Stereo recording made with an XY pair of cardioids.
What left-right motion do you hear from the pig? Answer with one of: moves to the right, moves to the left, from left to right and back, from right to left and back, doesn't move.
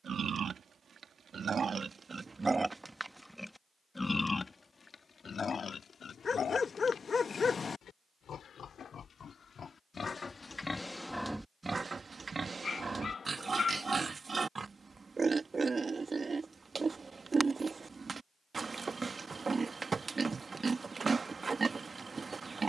from right to left and back.